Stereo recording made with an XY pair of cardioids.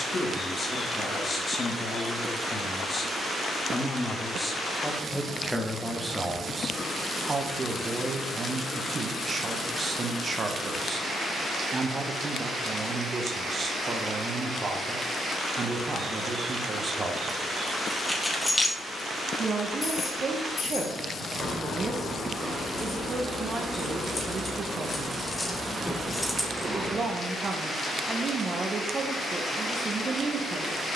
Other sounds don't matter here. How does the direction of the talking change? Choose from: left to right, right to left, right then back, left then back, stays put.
left to right.